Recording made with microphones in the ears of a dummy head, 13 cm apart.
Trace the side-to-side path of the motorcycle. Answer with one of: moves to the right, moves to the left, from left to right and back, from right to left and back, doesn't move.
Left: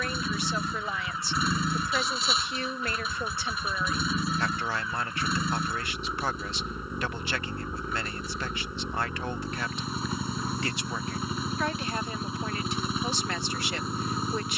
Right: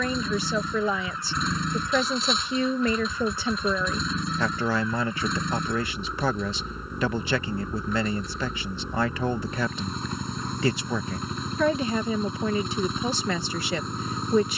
doesn't move.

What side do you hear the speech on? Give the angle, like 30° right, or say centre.
80° right.